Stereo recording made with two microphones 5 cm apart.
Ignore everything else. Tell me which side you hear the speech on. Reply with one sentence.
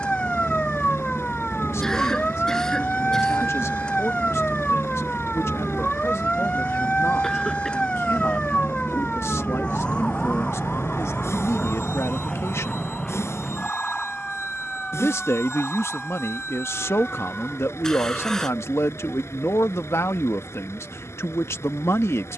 In this clip you hear the speech on the left.